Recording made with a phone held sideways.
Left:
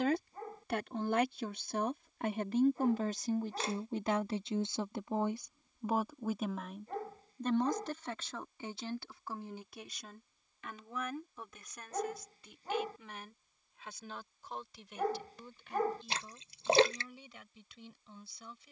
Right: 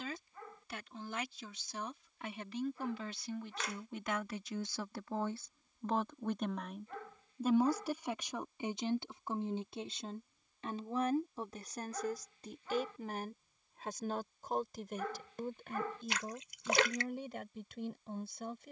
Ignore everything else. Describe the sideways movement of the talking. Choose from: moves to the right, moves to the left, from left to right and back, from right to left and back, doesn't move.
moves to the right.